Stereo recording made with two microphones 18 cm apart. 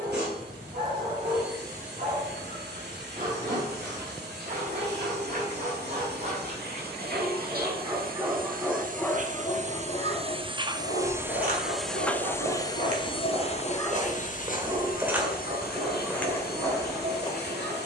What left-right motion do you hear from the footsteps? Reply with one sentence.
You can hear the footsteps move to the left.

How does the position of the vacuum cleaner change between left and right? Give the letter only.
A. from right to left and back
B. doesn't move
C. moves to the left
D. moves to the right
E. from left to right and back
C.